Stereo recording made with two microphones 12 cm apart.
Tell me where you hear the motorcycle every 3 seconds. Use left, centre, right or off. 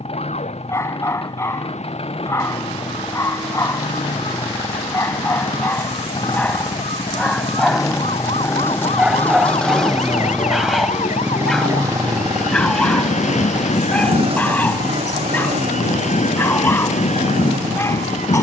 left, left, left, centre, right, right.